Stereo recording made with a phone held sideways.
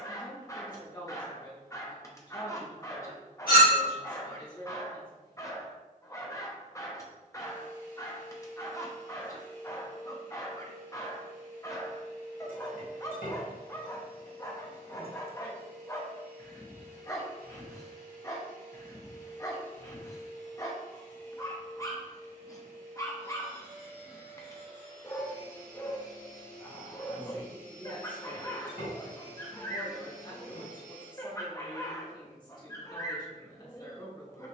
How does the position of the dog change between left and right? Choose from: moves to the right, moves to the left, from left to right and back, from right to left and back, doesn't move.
doesn't move.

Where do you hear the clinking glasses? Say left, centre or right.
left.